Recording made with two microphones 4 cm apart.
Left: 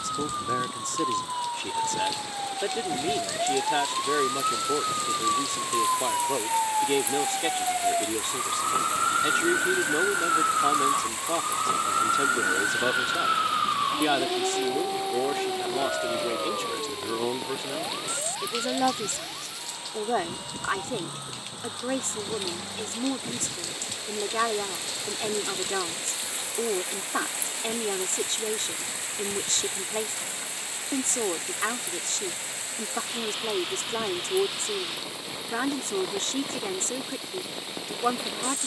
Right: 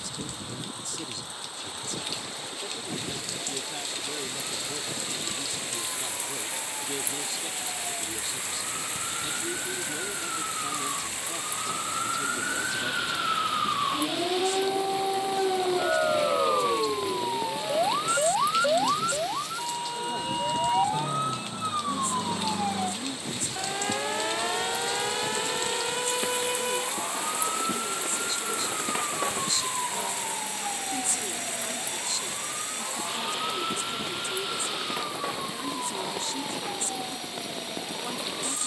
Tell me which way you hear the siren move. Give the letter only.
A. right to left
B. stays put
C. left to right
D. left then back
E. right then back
C.